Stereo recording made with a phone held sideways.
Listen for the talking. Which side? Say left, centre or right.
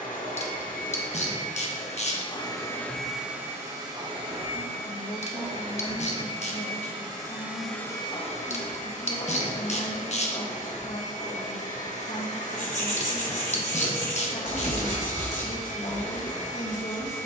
left.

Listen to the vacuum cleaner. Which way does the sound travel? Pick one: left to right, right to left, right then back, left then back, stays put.
right then back.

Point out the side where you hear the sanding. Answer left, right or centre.
left.